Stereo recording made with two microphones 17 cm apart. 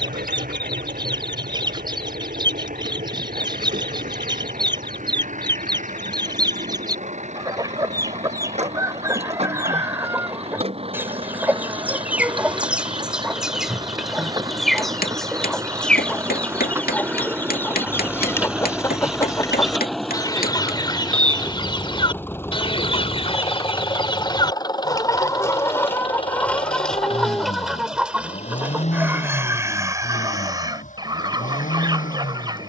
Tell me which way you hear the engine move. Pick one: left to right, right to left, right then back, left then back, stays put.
right to left.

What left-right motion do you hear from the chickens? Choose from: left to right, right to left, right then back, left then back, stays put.
left then back.